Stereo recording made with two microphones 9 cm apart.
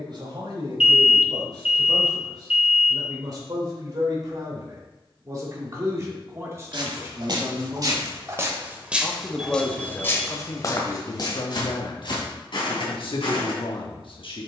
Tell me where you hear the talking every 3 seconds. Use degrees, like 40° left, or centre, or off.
50° right, 40° right, 20° right, 30° left, 60° left.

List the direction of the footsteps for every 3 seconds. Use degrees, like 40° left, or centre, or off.
off, off, 40° right, 30° left, 60° left.